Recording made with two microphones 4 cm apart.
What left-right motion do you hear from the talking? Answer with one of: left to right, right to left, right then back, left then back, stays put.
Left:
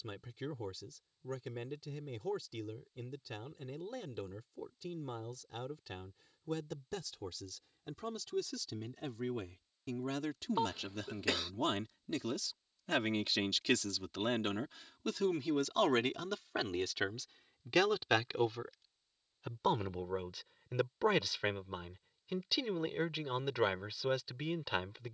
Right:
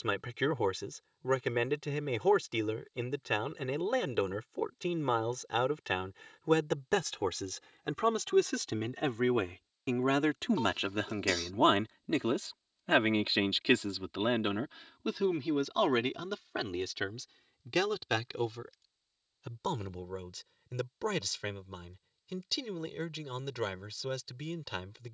right to left.